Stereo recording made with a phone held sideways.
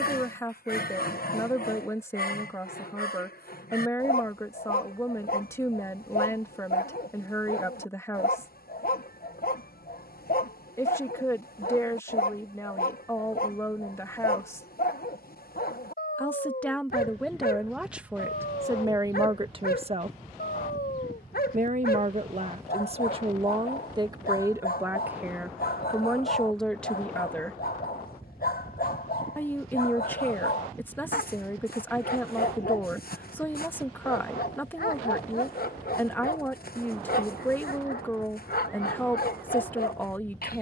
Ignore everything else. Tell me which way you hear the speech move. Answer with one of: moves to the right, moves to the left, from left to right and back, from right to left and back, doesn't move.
from left to right and back.